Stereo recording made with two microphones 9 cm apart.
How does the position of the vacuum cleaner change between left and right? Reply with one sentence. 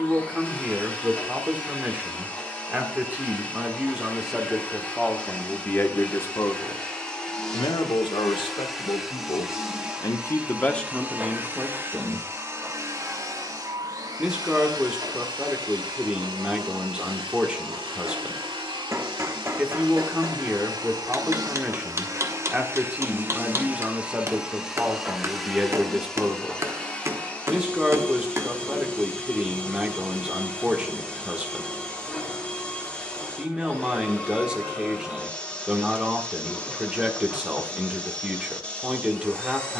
You can hear the vacuum cleaner move from left to right and back again.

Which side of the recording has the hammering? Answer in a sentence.
In this clip you hear the hammering on the right.